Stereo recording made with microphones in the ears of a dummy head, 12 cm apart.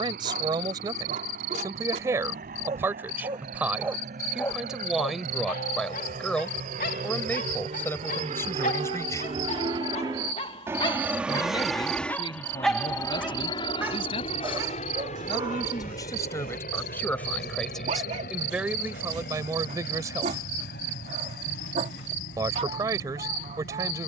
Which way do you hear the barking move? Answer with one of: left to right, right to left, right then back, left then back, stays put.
left then back.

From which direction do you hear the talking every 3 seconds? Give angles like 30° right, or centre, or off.
30° right, 10° right, 10° left, 30° left, 40° left, 20° left, 20° right, 20° right.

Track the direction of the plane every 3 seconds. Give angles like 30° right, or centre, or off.
70° right, 70° right, 50° right, 20° right, 30° left, 60° left, 70° left, 70° left.